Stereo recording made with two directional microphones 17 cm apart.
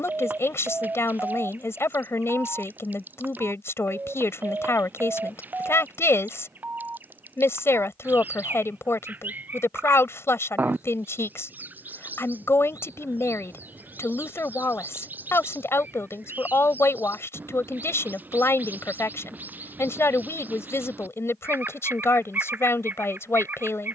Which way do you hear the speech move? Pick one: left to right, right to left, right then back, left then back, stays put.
stays put.